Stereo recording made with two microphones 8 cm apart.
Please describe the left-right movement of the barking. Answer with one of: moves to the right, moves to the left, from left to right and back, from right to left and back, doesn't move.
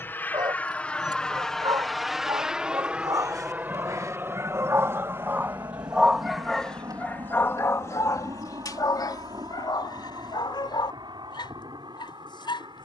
moves to the left.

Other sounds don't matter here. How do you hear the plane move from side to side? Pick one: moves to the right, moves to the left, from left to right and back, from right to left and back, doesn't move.
moves to the right.